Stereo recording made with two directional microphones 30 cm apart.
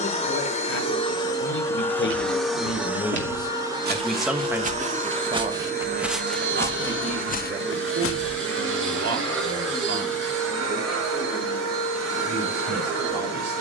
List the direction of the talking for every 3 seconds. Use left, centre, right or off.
left, centre, right, right, right.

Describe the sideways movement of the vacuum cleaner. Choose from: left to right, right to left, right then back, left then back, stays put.
left to right.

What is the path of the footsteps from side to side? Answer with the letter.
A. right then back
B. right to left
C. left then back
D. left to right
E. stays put
B.